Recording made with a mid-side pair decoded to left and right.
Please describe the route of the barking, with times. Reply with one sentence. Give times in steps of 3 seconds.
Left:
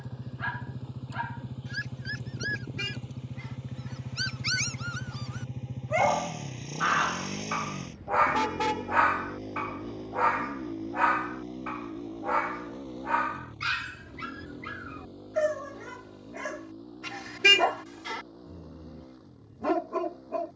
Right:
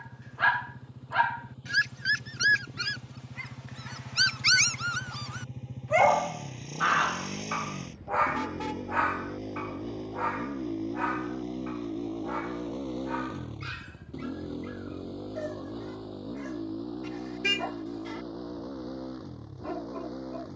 You can hear the barking on the right from 0 s, in the centre from 6 s and on the left from 9 s.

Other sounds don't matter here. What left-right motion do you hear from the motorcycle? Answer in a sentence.
In this clip you hear the motorcycle travel towards the right.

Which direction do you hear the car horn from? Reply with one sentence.
You can hear the car horn on the left.